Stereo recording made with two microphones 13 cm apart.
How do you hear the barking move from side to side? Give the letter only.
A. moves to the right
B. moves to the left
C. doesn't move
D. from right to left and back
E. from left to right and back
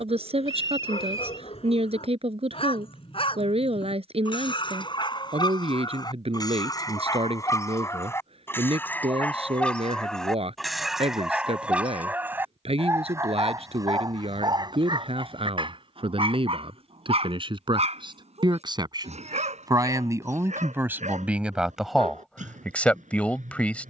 A.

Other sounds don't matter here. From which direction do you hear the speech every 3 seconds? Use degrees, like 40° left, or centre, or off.
50° right, 50° right, 50° right, 50° right, 50° right, 40° right, 30° right, centre.